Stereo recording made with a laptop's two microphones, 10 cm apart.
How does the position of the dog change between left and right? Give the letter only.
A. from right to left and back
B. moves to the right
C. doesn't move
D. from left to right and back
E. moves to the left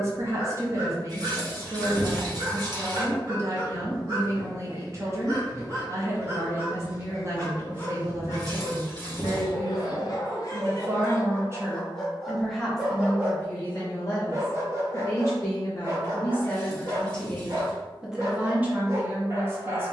A.